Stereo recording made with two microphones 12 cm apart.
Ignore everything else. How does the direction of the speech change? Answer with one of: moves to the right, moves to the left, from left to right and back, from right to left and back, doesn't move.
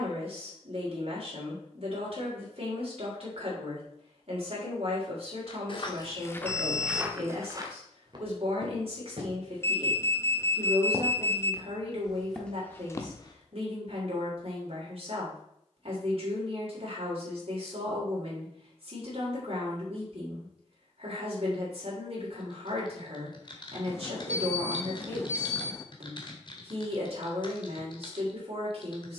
doesn't move.